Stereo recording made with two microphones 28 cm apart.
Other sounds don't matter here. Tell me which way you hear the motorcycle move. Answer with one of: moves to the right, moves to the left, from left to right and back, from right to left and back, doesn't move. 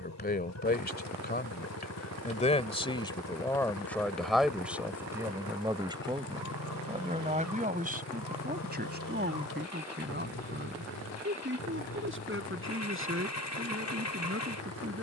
doesn't move.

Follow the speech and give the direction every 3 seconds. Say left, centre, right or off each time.
left, centre, right, right, right.